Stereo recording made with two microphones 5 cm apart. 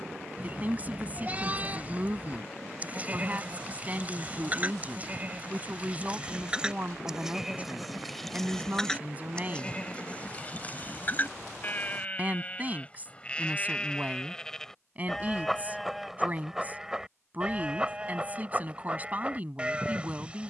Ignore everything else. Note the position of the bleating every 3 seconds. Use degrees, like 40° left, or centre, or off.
30° right, 30° right, 10° right, 30° left, 20° left, 10° right, 20° right.